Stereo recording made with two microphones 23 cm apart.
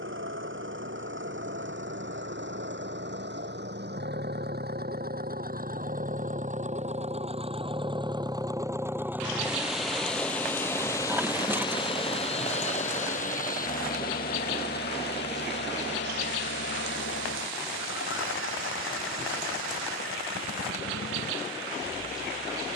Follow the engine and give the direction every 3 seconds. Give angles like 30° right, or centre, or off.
60° right, 50° right, 20° right, 10° left, 40° left, 50° left, 60° left, 70° left.